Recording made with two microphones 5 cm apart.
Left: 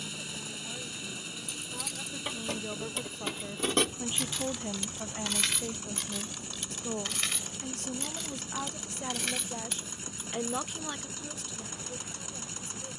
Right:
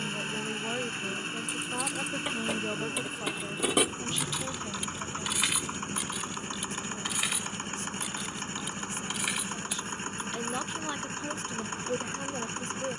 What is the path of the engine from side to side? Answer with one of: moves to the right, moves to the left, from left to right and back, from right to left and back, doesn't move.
doesn't move.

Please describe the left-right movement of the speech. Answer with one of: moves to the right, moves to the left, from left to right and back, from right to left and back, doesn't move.
from right to left and back.